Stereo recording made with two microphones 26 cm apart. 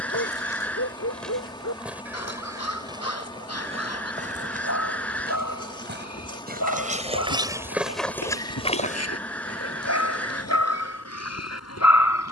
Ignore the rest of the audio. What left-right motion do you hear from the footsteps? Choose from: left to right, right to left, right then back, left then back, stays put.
right then back.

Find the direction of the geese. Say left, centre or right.
centre.